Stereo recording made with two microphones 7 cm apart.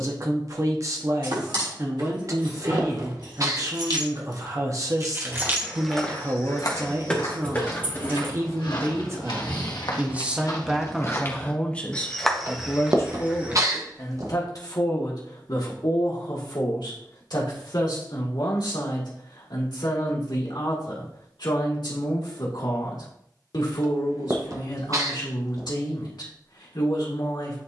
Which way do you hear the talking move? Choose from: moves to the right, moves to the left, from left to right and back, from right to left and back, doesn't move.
moves to the left.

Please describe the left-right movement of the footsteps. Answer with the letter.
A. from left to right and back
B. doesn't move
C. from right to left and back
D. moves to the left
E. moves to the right
C.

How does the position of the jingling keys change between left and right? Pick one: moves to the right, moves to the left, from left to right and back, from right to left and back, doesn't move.
moves to the left.